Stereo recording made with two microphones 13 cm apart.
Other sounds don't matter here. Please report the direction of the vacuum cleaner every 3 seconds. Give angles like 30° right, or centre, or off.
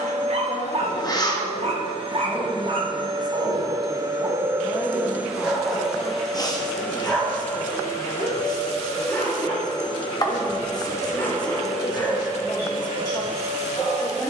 50° right, 20° right, 20° left, 20° left, 40° right.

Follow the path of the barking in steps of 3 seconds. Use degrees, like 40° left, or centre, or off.
50° right, 20° right, 10° left, 20° left, 30° left.